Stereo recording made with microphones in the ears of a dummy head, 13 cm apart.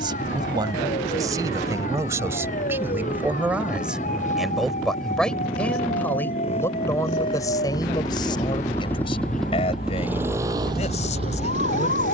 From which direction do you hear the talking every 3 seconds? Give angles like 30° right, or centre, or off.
20° right, centre, 30° left, 50° left.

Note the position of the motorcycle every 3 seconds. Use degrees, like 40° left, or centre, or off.
60° left, 50° left, 30° left, 20° right.